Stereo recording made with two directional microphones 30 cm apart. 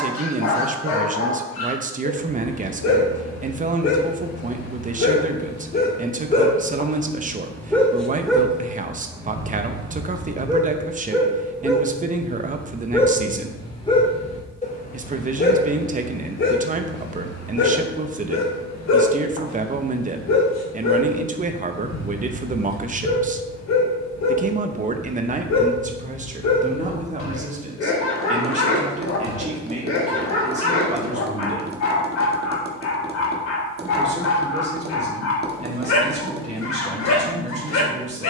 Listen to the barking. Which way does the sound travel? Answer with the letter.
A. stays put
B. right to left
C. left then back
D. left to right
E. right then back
E.